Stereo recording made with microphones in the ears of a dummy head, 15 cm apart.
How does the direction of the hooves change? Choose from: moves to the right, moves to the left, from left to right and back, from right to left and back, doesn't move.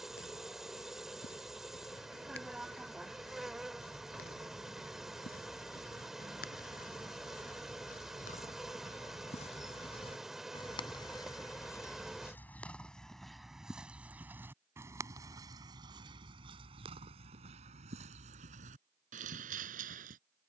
moves to the right.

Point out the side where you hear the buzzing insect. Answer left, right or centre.
centre.